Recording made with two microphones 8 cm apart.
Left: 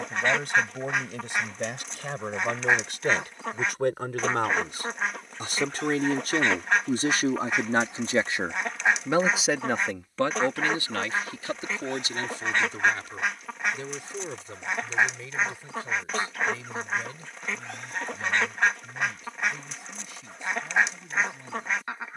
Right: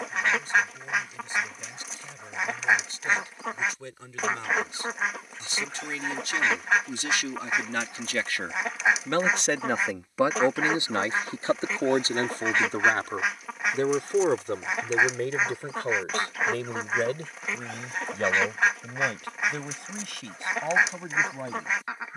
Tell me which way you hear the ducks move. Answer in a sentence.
You can hear the ducks stay in one place.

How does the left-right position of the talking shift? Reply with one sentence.
You can hear the talking go from the left side to the right.